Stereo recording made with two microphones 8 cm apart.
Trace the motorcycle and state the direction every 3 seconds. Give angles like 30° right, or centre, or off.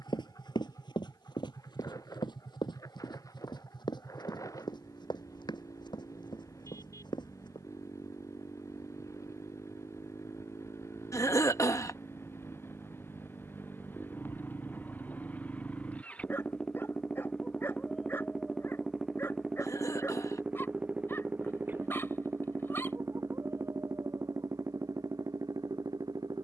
50° left, 50° left, 50° left, 40° left, 30° left, 20° left, 10° right, 30° right, 50° right.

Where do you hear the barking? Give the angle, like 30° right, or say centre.
30° left.